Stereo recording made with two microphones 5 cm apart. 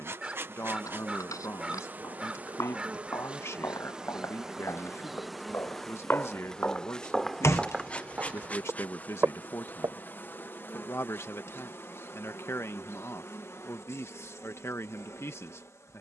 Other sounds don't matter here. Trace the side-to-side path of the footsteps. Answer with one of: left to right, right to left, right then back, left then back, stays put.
left to right.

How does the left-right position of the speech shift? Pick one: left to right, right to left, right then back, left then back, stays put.
stays put.